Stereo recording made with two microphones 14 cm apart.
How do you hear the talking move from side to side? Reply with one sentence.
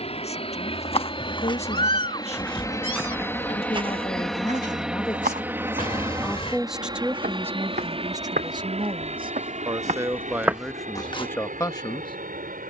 In this clip you hear the talking go right and come back.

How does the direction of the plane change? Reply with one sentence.
In this clip you hear the plane move to the right.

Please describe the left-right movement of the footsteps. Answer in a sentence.
In this clip you hear the footsteps move from left to right and back again.